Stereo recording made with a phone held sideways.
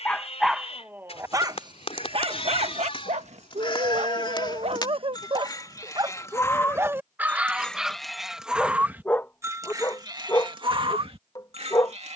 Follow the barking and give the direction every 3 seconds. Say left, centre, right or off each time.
right, right, centre, left.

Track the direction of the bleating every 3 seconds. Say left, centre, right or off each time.
left, left, centre, right.